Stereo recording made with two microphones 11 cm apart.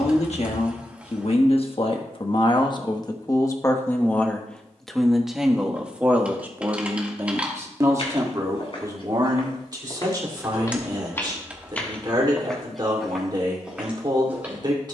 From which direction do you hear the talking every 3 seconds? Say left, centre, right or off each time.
left, centre, right, right, right.